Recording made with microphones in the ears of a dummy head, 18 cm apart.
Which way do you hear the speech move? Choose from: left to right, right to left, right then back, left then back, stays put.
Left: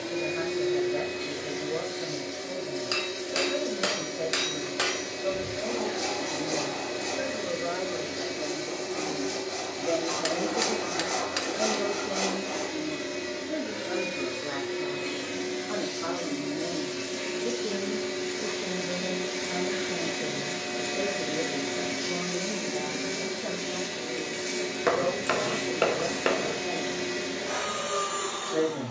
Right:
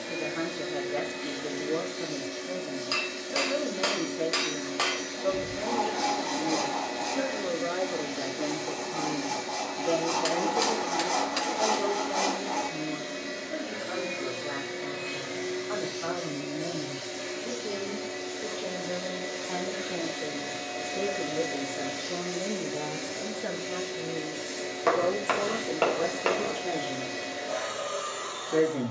left then back.